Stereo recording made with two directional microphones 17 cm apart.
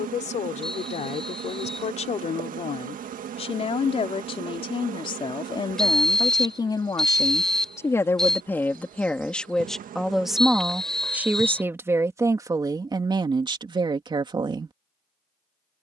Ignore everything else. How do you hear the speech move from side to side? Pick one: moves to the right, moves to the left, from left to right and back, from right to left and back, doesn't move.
moves to the right.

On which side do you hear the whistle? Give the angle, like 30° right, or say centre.
centre.